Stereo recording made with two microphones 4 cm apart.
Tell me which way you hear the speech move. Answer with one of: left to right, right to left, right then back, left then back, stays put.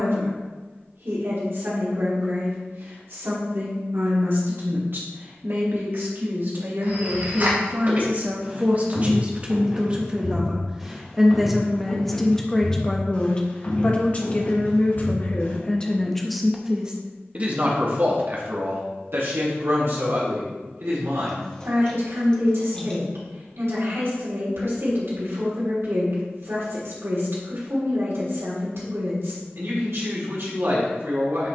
left then back.